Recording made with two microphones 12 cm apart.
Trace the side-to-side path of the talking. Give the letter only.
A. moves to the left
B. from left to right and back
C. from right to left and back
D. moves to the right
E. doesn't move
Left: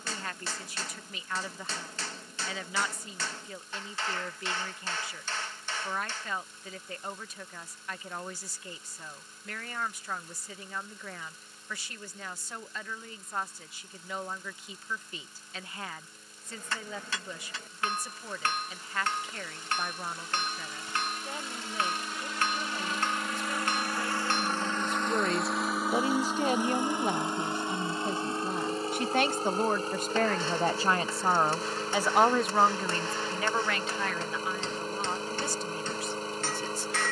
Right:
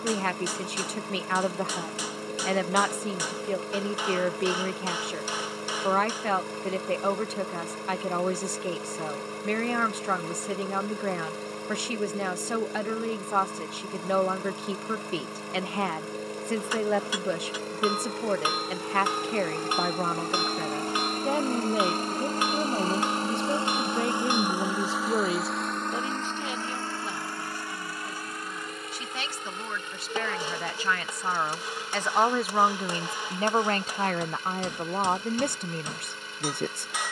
C.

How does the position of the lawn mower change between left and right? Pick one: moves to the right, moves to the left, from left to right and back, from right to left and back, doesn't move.
moves to the left.